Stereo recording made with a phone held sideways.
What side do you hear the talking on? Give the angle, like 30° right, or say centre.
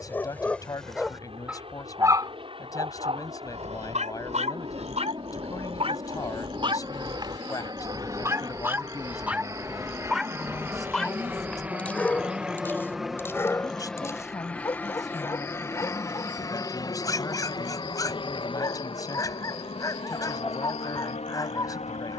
30° left.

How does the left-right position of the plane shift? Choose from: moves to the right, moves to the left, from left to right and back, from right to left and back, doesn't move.
moves to the left.